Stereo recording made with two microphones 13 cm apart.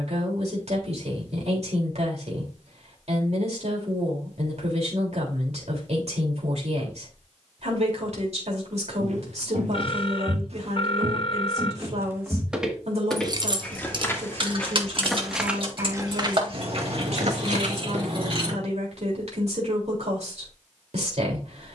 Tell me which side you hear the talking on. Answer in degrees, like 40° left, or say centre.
60° right.